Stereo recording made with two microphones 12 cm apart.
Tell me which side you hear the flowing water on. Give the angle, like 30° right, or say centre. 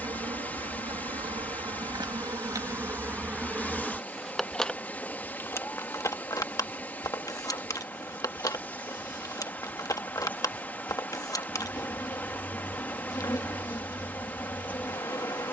10° left.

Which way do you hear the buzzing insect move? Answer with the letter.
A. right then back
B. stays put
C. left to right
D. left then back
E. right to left
E.